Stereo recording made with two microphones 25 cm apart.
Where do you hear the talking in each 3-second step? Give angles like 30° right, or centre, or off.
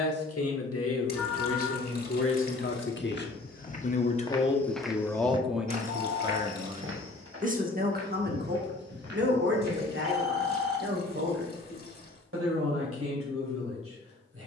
60° left, 20° left, 30° right, 50° right, 60° right.